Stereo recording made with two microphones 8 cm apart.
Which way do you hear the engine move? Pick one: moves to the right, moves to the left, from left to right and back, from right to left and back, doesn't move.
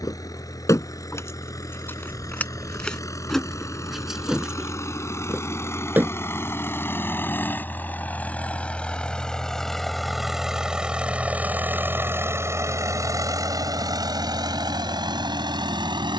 moves to the right.